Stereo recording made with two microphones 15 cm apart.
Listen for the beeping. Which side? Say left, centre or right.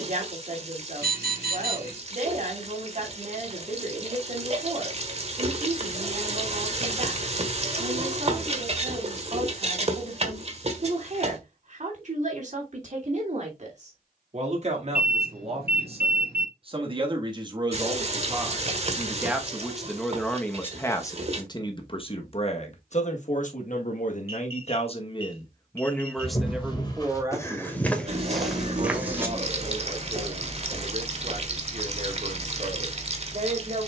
right.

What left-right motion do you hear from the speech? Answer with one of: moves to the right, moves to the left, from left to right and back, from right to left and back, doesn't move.
from right to left and back.